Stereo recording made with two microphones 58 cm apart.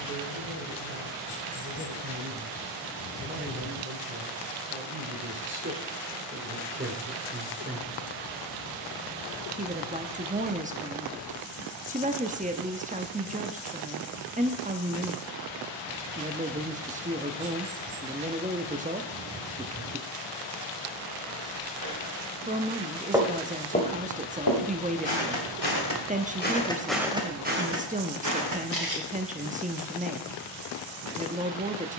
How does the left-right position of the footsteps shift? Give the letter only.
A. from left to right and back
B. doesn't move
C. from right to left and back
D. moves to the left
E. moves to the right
C.